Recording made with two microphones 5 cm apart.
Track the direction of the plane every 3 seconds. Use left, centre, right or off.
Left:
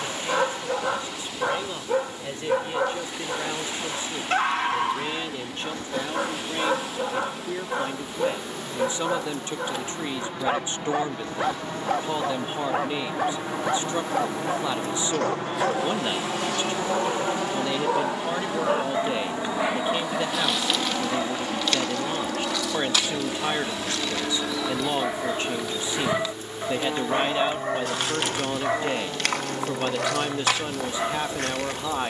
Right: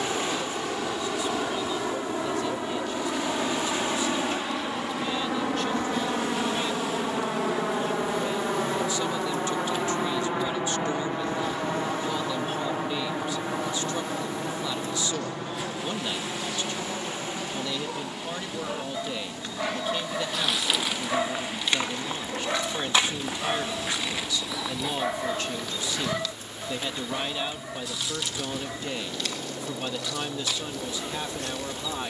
right, right, right, right, centre, left, left, left, left, left, left.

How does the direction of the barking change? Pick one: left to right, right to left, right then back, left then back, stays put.
right then back.